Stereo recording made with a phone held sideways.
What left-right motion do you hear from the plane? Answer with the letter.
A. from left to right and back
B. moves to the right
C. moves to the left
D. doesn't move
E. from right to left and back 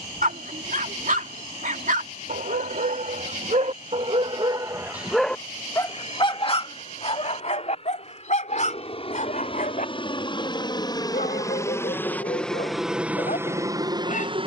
B.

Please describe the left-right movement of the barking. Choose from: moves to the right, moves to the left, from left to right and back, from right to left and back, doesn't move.
moves to the left.